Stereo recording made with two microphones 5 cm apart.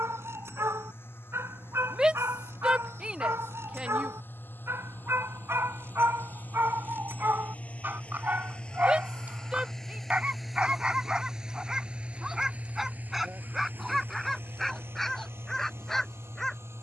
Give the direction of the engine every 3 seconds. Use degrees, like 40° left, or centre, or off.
60° left, 50° left, 30° left, centre, 40° right, 60° right.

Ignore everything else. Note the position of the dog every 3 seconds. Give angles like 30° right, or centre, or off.
70° right, 70° right, 50° right, 20° right, centre, 10° left.